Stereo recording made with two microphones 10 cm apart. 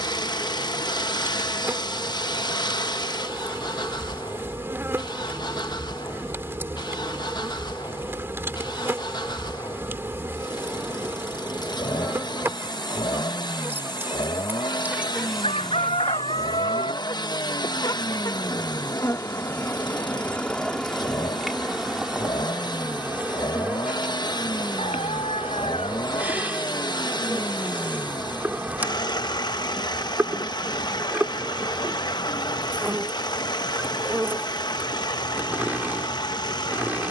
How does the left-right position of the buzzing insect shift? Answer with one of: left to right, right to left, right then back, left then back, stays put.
left then back.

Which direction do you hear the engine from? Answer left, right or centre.
left.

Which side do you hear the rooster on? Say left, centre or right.
left.